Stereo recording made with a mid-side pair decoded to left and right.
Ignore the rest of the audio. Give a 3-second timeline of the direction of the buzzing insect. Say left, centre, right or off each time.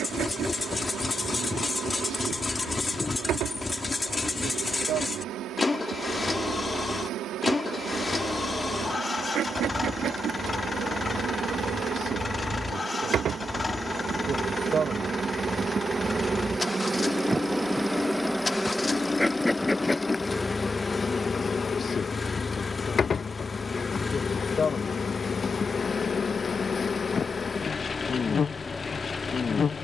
right, right, right, right, right, right, centre, left, left, left.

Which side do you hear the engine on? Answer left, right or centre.
left.